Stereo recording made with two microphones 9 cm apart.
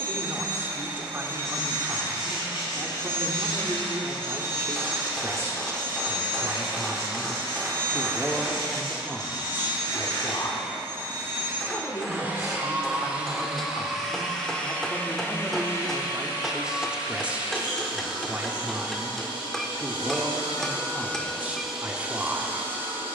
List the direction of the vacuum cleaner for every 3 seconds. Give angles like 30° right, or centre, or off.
30° right, 30° right, 30° right, 30° right, 10° right, 50° left, 70° left, 10° right.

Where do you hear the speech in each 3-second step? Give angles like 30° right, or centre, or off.
30° right, 30° right, 10° right, 30° left, 30° left, centre, 20° right, 20° right.